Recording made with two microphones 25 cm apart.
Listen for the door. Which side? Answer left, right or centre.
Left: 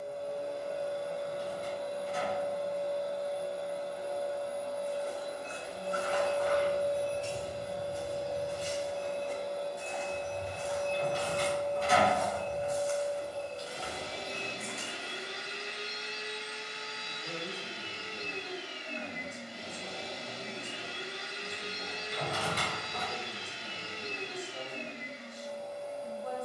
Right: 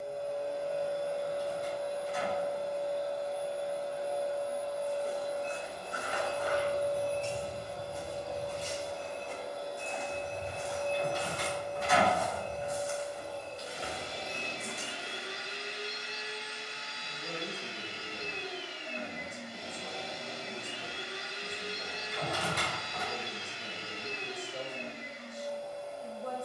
left.